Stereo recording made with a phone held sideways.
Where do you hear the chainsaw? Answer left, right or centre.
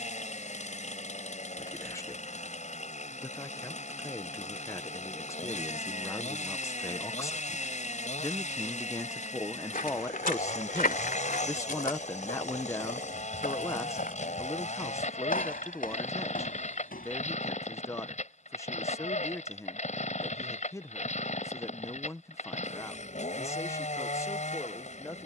left.